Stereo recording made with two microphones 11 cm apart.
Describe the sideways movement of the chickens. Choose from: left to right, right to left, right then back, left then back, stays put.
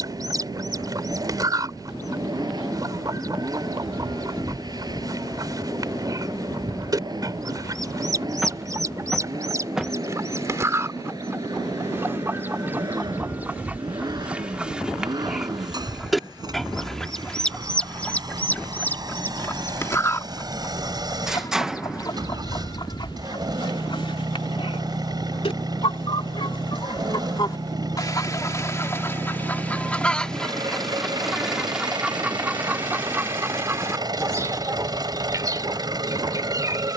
left then back.